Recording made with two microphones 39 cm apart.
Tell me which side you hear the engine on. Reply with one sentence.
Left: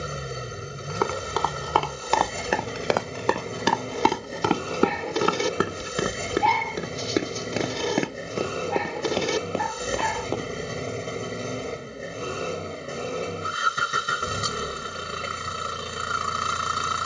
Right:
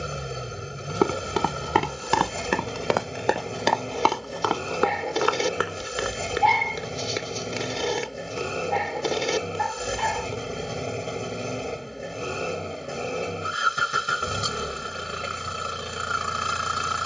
In this clip you hear the engine in the centre.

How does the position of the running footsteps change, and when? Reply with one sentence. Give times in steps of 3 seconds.
You can hear the running footsteps on the right from 0 s, on the left from 3 s and not at all from 12 s.